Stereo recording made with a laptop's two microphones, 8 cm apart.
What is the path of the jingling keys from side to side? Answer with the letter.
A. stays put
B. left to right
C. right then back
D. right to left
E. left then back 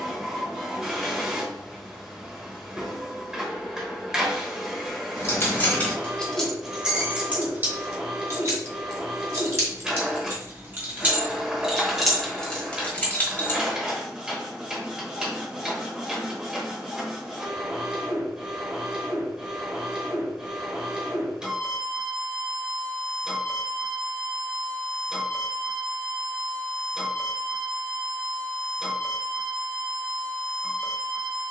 C.